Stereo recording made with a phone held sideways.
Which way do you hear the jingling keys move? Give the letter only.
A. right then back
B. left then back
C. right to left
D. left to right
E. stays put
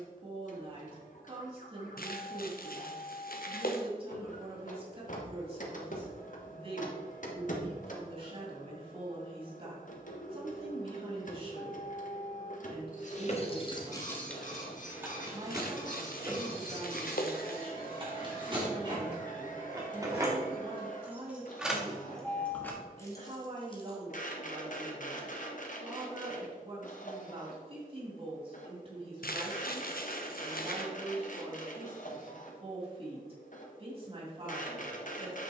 A.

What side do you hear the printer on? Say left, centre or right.
left.